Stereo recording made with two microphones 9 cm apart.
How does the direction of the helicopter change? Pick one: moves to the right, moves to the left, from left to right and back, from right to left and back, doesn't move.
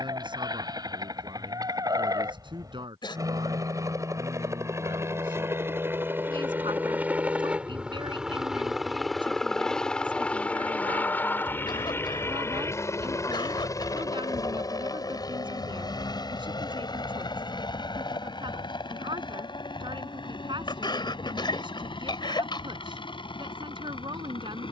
moves to the left.